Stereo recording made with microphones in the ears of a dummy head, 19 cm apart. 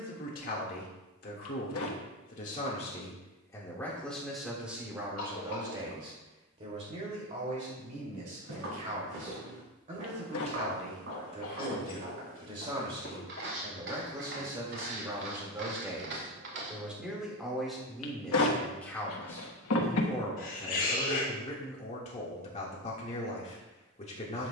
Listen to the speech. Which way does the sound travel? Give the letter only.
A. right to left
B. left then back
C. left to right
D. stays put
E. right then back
E.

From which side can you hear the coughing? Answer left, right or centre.
left.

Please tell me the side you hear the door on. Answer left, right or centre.
left.